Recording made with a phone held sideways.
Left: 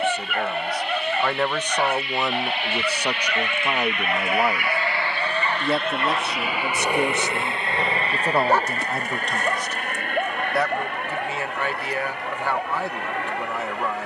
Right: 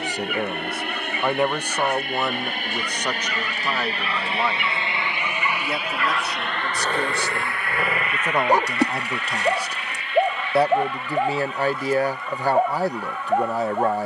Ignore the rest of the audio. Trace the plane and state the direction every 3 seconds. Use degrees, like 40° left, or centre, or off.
60° right, 30° right, 20° left, 50° left, 60° left.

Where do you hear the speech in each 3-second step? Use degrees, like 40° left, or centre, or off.
10° right, 20° left, 20° left, 20° right, 40° right.